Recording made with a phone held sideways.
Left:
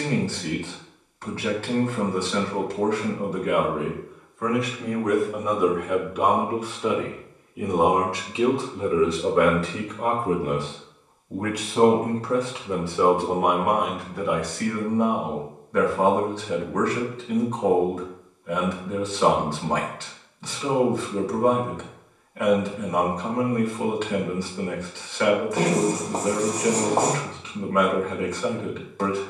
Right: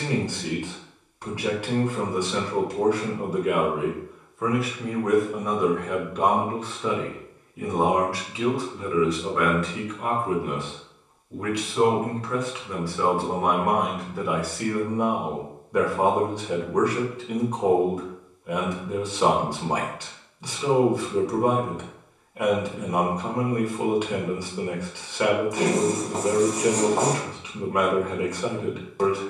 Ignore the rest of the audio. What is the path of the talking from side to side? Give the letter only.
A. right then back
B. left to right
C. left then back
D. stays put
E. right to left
C.